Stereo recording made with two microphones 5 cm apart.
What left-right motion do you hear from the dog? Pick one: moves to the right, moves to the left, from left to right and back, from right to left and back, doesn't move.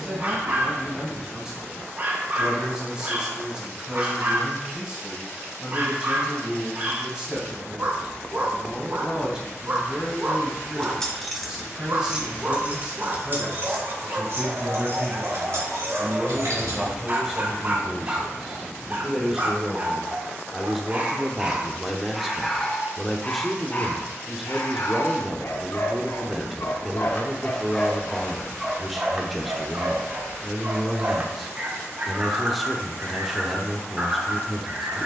from right to left and back.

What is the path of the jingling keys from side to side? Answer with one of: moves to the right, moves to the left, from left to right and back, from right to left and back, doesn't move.
moves to the right.